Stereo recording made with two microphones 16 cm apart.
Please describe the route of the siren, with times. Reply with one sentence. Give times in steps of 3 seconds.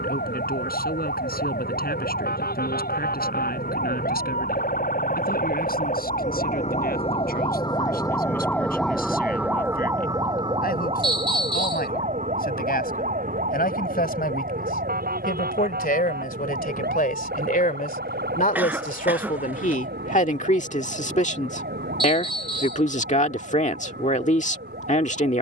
You can hear the siren on the left from 0 s and on the right from 9 s.